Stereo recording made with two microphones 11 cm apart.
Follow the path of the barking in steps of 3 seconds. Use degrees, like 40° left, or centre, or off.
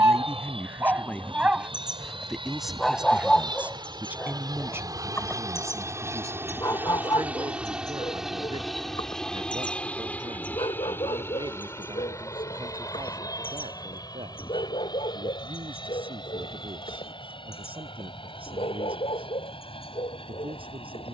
10° right, 20° left, 40° left, 50° left, 60° left, 60° left, 60° left.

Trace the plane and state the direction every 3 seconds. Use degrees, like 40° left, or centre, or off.
60° right, 40° right, 10° right, 20° left, 30° left, 40° left, 50° left.